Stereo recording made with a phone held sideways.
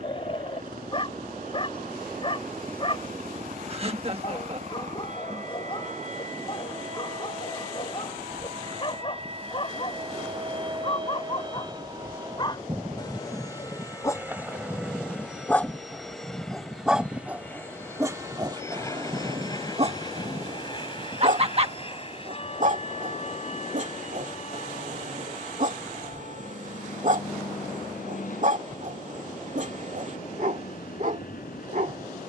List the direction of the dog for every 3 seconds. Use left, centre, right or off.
left, left, left, left, left, centre, right, right, right, right, right.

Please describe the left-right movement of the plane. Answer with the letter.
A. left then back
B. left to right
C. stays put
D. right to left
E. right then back
D.